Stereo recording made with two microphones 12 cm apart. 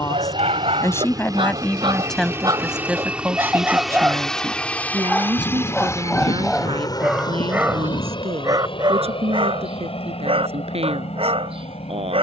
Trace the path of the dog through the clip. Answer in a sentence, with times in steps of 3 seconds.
You can hear the dog on the right from 0 s, in the centre from 3 s and on the right from 9 s.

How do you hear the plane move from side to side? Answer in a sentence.
In this clip you hear the plane go from the right side to the left.